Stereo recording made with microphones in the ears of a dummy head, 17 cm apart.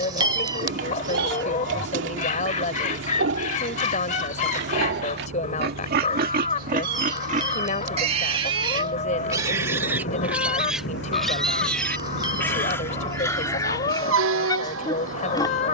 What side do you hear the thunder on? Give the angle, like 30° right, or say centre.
60° left.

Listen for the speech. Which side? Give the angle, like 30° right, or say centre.
40° left.